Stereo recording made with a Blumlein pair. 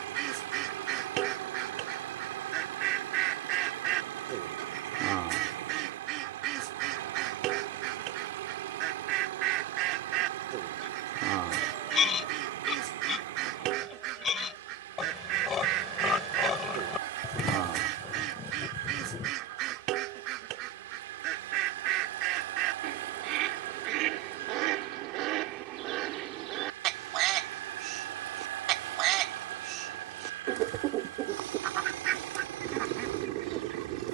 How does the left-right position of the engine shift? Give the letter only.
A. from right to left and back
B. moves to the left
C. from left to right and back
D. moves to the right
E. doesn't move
E.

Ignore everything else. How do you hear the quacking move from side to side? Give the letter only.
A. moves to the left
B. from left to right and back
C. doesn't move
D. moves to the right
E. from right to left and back
C.